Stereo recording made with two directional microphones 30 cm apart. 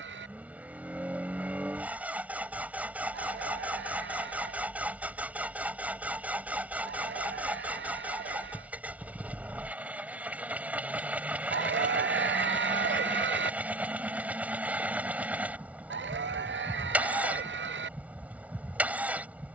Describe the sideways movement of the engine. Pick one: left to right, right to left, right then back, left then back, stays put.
stays put.